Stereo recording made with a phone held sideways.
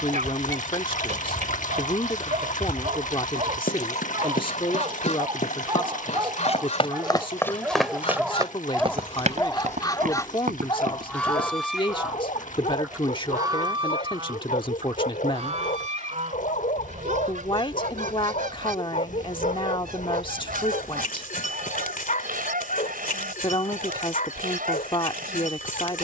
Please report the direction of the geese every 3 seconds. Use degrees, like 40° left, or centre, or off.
50° left, 50° left, 40° left, 20° left, 20° right, 50° right, 70° right, 70° right, 70° right.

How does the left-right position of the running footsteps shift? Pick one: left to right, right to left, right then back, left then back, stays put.
left to right.